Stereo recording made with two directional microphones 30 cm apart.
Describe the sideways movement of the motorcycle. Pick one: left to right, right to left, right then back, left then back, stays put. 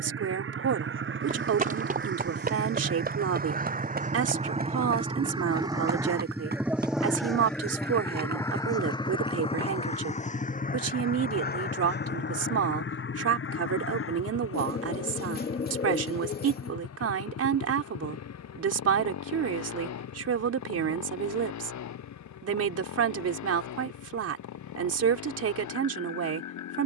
right to left.